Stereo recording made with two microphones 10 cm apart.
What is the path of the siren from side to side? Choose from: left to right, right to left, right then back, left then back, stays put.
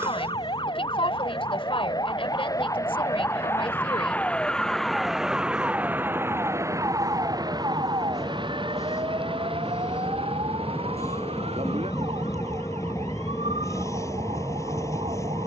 left to right.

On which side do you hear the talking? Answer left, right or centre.
left.